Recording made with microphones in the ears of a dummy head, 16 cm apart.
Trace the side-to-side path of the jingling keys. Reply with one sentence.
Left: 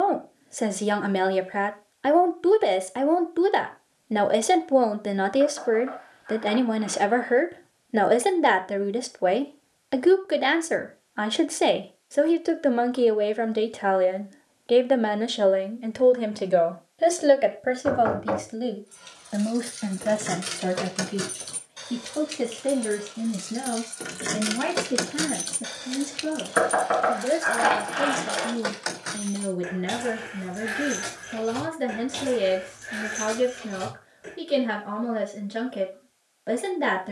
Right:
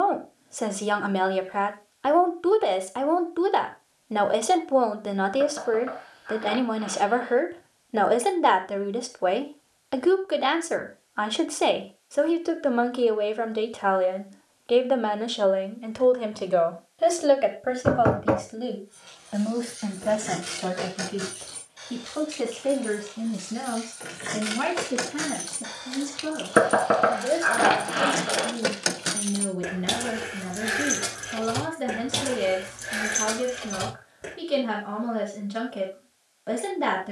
You can hear the jingling keys move from left to right.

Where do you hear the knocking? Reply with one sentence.
In this clip you hear the knocking on the right.